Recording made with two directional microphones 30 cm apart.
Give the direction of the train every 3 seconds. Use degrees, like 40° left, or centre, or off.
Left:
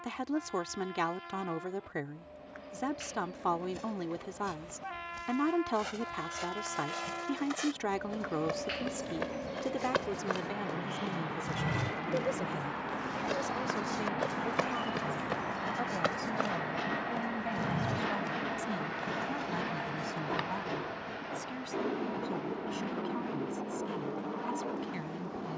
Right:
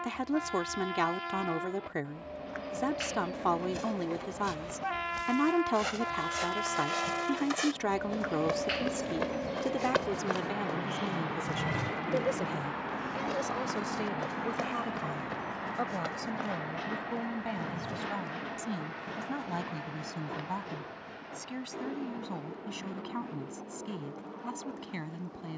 60° right, 50° right, 40° right, 20° right, centre, 20° left, 30° left, 50° left, 50° left.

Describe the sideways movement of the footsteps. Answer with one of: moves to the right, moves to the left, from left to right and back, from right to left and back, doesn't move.
moves to the left.